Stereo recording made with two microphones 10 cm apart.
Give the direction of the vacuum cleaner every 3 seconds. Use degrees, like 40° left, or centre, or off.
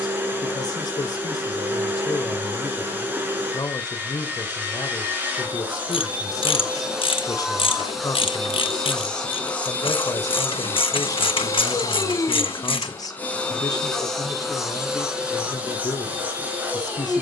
20° right, 20° right, centre, 20° left, 10° left, 10° right.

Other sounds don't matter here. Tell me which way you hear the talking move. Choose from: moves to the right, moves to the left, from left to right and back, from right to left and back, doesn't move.
doesn't move.